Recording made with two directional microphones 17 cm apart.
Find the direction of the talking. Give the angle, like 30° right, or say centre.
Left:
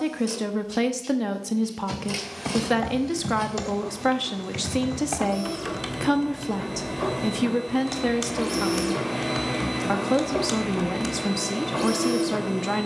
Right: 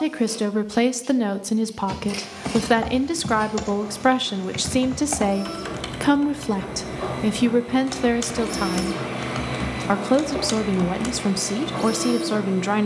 20° right.